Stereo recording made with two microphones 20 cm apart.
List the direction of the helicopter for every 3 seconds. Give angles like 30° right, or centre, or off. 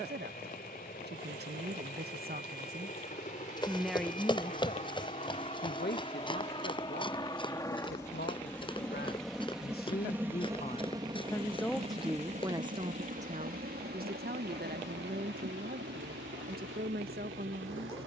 50° left, 40° left, 20° left, 10° right, 50° right, 70° right.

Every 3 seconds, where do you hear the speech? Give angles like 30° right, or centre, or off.
50° right, 30° left, 60° left, 30° left, 30° right, 50° right.